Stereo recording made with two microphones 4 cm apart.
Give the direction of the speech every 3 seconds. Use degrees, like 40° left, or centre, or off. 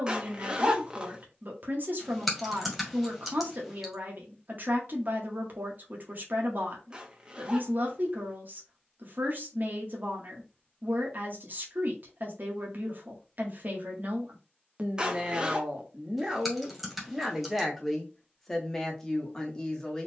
50° right, 50° right, 50° right, 50° right, 50° right, 20° right, 10° left.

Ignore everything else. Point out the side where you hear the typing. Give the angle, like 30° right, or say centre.
centre.